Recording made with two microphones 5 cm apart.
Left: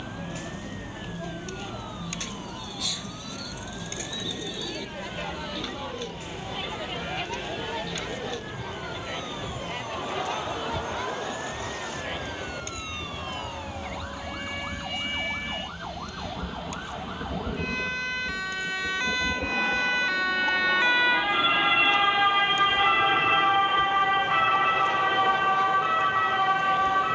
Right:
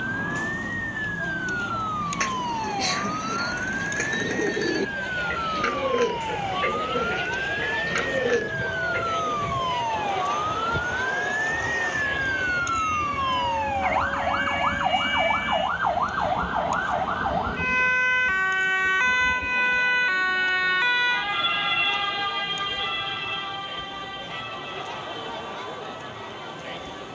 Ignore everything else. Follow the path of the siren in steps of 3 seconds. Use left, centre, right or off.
right, right, right, right, right, right, right, left, left.